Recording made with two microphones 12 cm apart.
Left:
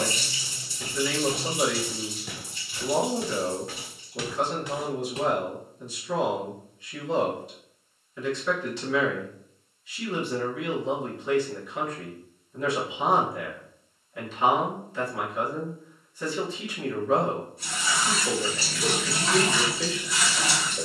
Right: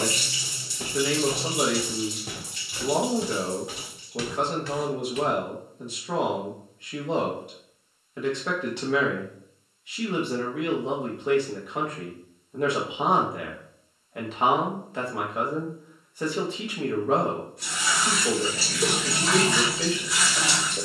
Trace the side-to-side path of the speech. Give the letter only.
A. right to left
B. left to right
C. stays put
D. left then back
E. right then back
C.